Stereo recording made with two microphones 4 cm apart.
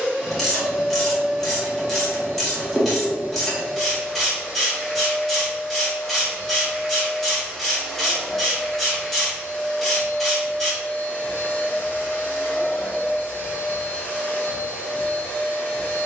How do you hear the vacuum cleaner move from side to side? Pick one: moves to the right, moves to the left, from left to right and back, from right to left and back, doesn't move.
moves to the left.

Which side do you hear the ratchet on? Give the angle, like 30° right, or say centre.
centre.